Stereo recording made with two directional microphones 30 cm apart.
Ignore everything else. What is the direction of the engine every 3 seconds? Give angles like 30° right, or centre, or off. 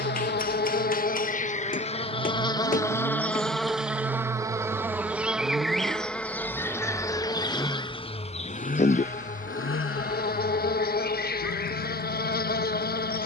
50° right, 30° right, 10° left, 50° left, 60° left.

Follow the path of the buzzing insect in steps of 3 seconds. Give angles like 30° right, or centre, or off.
20° left, centre, 10° left, 30° left, 30° left.